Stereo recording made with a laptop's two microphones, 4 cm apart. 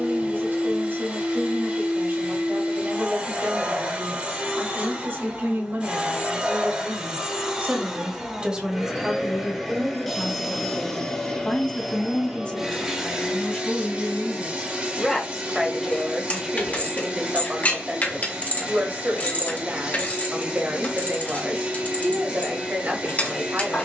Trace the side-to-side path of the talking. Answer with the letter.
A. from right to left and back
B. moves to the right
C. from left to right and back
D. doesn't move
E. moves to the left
A.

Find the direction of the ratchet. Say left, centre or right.
left.